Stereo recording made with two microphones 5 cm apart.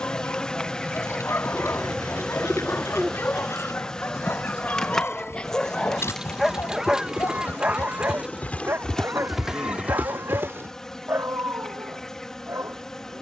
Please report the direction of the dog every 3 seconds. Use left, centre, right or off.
left, left, right, right, right.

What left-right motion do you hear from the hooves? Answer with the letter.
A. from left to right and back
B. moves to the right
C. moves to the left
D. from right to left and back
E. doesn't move
B.